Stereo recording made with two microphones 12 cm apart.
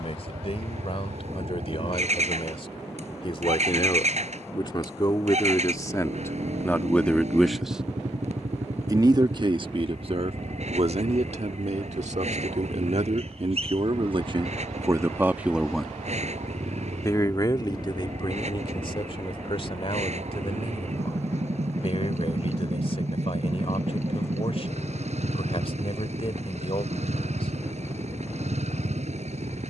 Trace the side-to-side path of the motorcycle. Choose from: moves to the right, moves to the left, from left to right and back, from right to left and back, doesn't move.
doesn't move.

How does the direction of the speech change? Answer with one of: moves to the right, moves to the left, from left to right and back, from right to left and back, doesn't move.
from left to right and back.